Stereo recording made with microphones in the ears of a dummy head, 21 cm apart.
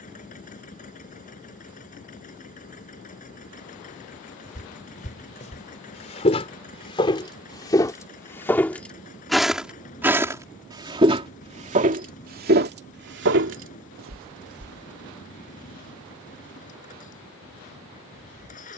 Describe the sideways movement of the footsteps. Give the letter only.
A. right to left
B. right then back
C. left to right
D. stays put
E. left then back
C.